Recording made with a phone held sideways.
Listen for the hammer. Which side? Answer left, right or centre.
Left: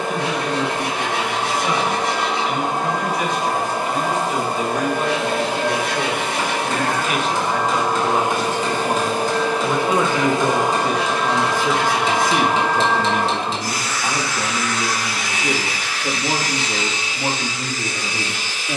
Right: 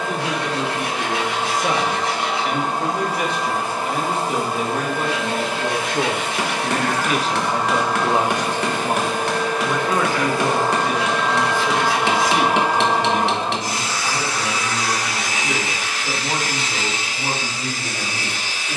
right.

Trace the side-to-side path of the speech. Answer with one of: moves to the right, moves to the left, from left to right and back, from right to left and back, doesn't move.
moves to the left.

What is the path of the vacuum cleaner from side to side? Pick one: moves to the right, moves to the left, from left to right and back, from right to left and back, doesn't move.
moves to the right.